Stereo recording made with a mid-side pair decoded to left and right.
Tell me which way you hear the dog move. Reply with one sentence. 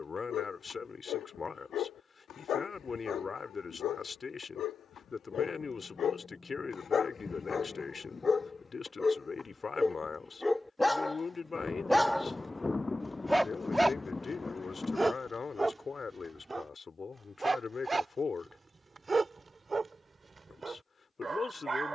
In this clip you hear the dog travel towards the right.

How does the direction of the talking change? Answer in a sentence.
In this clip you hear the talking stay put.